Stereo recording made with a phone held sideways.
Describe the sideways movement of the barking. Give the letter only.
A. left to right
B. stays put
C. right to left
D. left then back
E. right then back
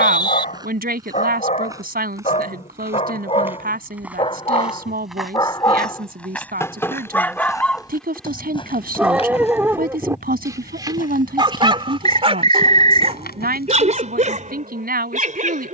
A.